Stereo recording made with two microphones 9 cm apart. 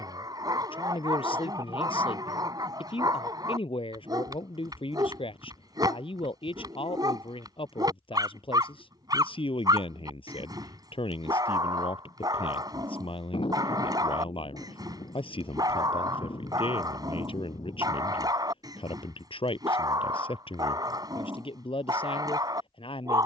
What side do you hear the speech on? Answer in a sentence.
In this clip you hear the speech on the left.